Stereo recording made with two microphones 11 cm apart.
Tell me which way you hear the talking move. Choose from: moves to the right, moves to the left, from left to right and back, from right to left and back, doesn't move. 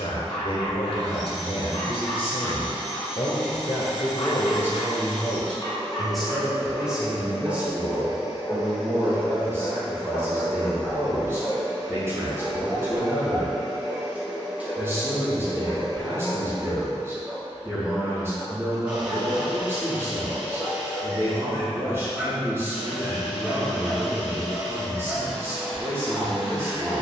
moves to the right.